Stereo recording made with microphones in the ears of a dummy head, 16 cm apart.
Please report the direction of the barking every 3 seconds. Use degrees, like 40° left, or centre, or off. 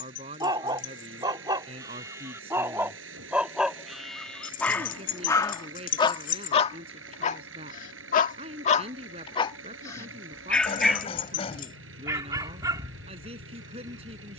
20° right, 10° left, 40° left, 10° left, 20° right.